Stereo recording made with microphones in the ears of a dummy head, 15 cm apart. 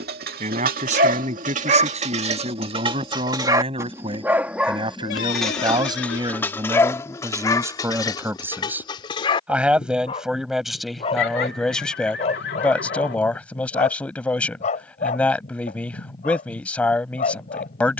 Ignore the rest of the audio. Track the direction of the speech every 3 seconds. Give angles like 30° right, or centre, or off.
40° right, 30° right, 20° right, centre, 10° left, 10° left.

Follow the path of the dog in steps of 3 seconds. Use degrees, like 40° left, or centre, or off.
50° right, 10° right, 20° left, 30° left, 40° left, 50° left.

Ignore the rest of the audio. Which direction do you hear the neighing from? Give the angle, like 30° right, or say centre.
70° left.